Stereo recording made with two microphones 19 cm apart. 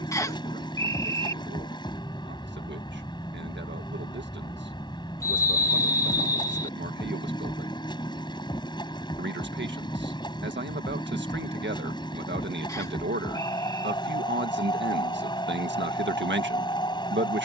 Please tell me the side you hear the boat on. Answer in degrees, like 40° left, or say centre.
20° left.